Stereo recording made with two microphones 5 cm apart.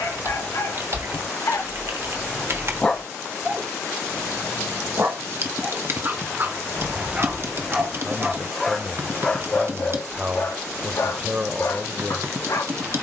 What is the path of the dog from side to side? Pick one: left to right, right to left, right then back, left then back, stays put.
right then back.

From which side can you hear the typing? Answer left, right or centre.
right.